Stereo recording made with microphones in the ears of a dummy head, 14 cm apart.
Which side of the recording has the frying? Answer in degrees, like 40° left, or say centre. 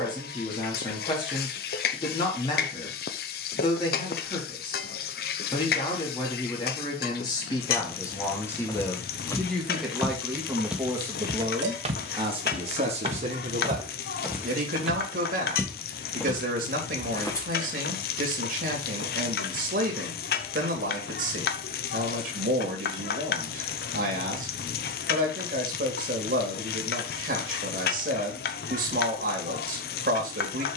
60° left.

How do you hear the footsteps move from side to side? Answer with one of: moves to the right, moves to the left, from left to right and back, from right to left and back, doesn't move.
from left to right and back.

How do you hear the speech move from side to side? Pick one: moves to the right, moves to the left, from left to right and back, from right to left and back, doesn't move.
moves to the right.